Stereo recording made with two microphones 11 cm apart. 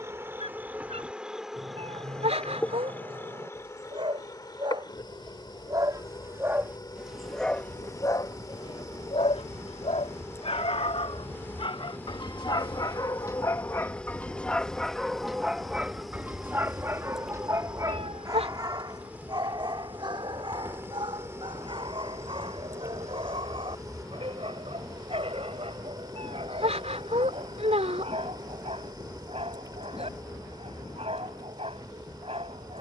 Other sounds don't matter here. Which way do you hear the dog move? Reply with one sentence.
You can hear the dog move from right to left and back again.